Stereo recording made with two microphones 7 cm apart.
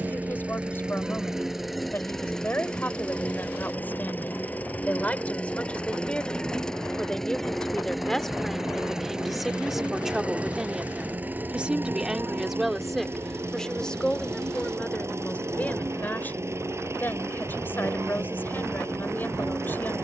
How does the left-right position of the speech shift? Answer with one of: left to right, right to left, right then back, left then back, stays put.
right then back.